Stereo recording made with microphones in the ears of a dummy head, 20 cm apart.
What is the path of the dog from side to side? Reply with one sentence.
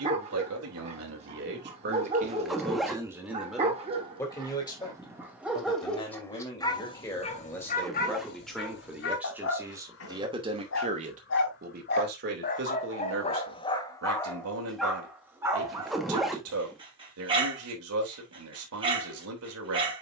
You can hear the dog go left and come back.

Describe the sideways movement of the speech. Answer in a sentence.
You can hear the speech move from right to left and back again.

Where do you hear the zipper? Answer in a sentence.
You can hear the zipper in the centre.